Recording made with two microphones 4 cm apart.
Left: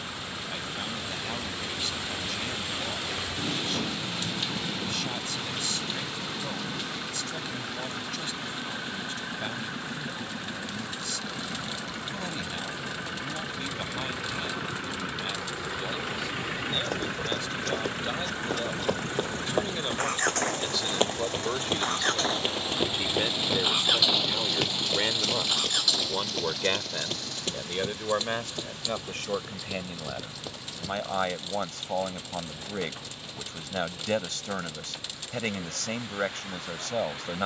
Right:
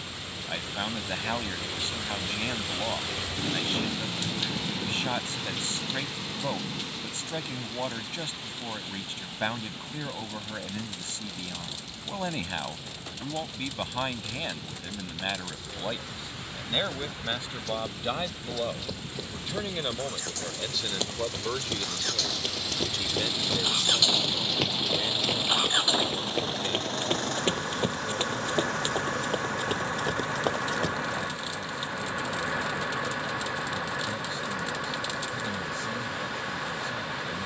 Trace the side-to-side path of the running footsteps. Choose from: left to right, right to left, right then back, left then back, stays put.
left to right.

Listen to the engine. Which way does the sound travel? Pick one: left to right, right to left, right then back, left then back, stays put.
left to right.